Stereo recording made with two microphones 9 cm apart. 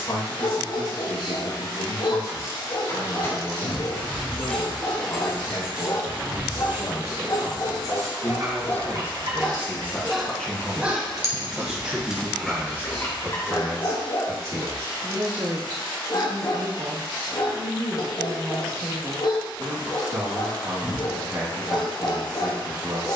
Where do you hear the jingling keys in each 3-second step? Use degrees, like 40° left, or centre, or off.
30° left, 10° left, 30° right, 50° right, 20° left, off, off, off.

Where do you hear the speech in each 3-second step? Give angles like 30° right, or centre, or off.
60° left, 60° left, 40° left, 10° left, 30° right, 50° right, 60° right, 60° right.